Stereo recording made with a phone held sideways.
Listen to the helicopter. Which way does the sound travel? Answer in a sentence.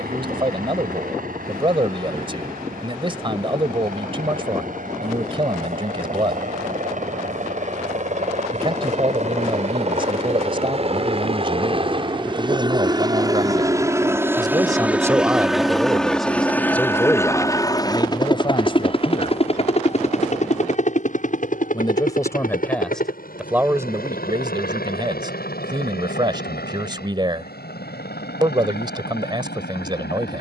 You can hear the helicopter go from the right side to the left.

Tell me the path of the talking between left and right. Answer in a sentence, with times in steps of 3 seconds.
You can hear the talking on the right from 0 s, in the centre from 15 s, on the left from 18 s, in the centre from 21 s and on the right from 24 s.